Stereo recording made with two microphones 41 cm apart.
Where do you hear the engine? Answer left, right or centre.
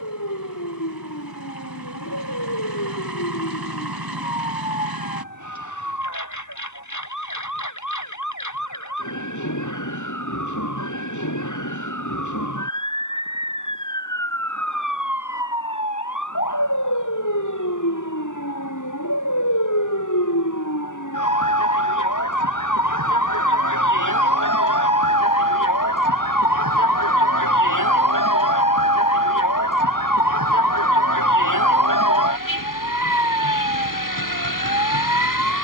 right.